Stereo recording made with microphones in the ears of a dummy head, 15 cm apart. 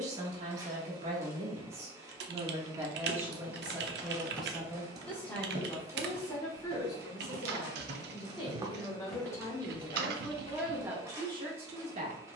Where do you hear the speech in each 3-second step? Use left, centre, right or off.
right, centre, left, centre.